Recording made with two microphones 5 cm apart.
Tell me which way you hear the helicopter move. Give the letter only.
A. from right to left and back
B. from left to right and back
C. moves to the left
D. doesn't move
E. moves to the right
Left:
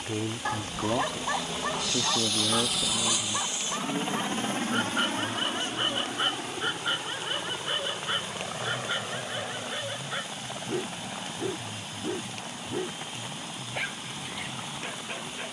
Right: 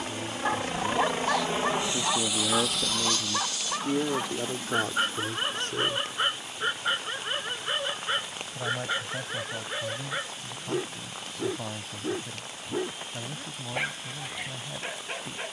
C.